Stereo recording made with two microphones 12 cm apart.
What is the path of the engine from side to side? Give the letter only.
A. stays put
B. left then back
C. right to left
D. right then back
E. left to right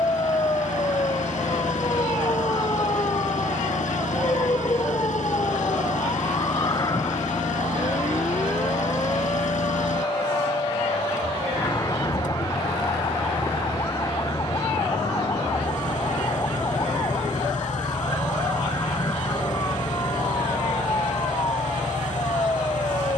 A.